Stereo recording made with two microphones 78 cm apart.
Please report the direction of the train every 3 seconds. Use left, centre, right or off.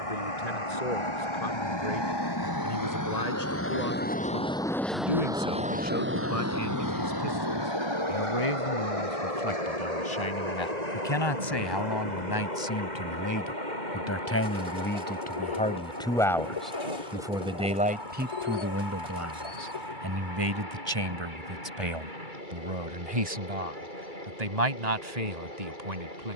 left, centre, right, right, right, right, right, right, right.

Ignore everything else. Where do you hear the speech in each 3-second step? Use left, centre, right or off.
left, left, left, left, left, centre, right, right, right.